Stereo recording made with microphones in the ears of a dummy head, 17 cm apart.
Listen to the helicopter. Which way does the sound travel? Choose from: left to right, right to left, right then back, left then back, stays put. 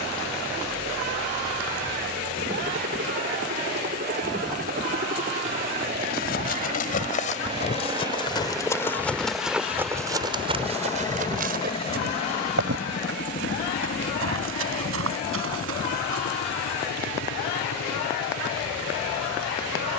right to left.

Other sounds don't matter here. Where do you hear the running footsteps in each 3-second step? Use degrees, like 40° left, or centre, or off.
off, off, 30° left, 30° right, 70° right, 80° right, off.